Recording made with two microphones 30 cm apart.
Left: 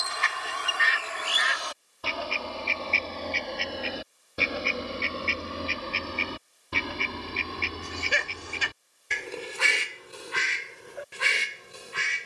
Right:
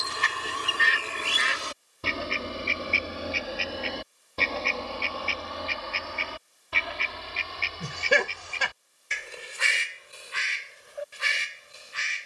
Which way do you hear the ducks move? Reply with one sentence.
You can hear the ducks move from right to left.